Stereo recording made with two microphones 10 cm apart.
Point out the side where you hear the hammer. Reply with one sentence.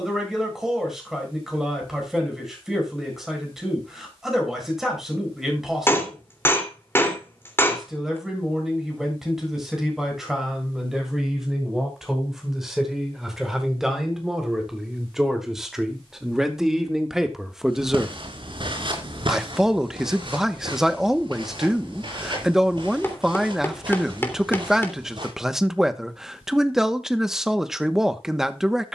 In this clip you hear the hammer on the left.